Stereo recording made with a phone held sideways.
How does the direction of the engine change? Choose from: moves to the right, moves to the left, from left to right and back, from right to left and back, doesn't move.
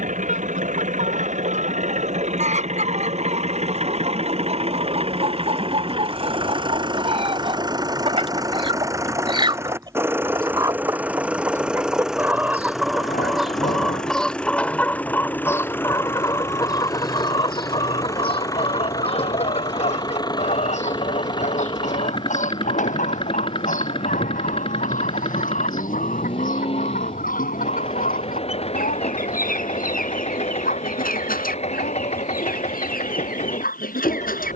moves to the left.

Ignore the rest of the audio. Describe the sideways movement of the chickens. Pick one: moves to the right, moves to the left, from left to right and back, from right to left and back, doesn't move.
moves to the left.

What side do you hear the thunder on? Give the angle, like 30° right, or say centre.
70° left.